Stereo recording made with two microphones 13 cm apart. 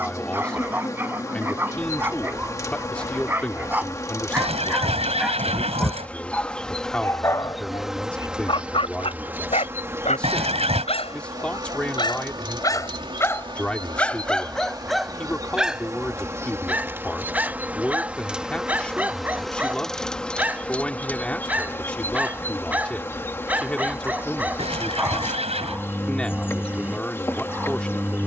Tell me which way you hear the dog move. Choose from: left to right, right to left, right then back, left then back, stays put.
left then back.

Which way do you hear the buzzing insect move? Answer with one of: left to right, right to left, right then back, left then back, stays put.
right then back.